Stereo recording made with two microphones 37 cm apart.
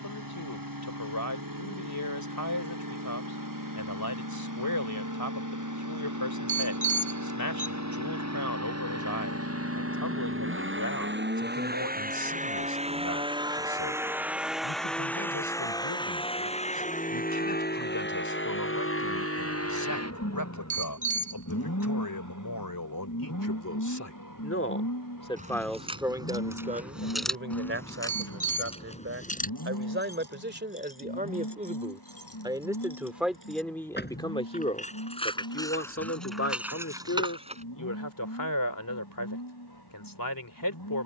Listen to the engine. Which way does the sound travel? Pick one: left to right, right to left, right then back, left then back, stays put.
right to left.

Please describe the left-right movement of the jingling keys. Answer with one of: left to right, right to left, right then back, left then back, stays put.
left then back.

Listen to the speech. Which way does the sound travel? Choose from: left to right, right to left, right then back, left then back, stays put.
right then back.